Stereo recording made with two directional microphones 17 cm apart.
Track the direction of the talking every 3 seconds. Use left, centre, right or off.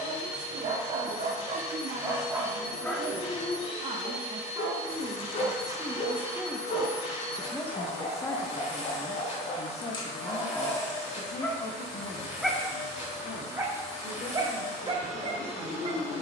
right, right, centre, left, left, left.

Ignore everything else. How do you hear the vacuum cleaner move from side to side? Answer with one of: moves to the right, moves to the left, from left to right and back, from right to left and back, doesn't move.
doesn't move.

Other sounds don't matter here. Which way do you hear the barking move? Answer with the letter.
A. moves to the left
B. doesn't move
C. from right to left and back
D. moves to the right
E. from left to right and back
C.